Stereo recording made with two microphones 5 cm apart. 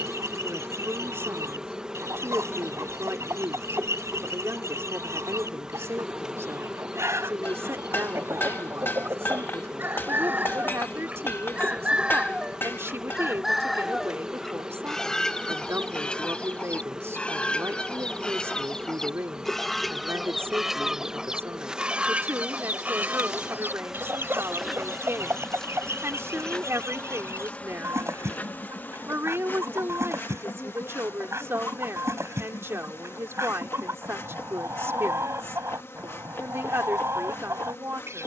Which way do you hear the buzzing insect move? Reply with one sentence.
You can hear the buzzing insect move from right to left.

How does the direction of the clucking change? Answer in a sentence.
You can hear the clucking go left and come back.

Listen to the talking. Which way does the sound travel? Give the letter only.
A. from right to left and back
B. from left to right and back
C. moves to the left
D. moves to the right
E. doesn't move
E.